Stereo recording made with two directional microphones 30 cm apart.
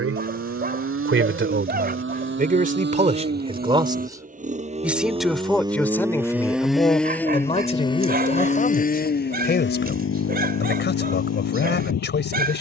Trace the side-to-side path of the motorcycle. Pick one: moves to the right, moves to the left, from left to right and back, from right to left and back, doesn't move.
moves to the left.